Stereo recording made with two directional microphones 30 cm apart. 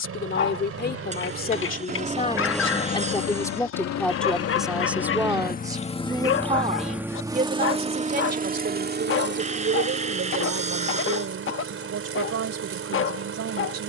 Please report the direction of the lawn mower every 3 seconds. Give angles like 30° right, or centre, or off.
30° right, 50° left, 10° right, 40° right, 50° right.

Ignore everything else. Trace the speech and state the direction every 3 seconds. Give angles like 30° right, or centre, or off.
30° left, centre, 30° right, 50° right, 50° right.